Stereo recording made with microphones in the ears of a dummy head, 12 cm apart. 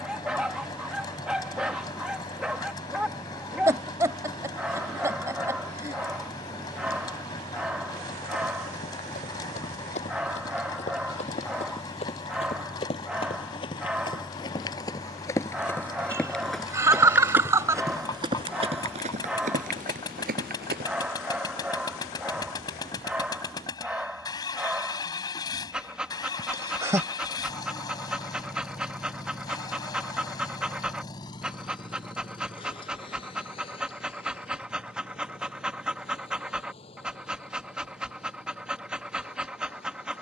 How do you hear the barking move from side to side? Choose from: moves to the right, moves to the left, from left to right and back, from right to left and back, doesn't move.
doesn't move.